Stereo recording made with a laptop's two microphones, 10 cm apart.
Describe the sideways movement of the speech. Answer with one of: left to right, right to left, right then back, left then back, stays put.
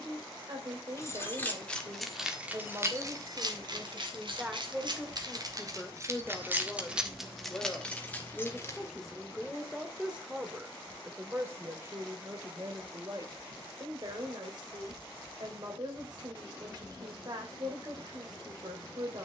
left then back.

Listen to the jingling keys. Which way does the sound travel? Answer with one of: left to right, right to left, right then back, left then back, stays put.
right then back.